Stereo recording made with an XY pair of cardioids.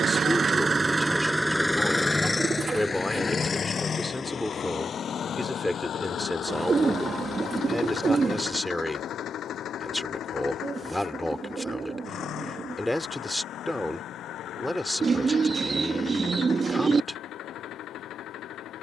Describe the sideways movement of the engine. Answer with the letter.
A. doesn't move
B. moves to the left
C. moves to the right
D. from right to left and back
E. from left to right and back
B.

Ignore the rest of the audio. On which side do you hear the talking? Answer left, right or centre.
centre.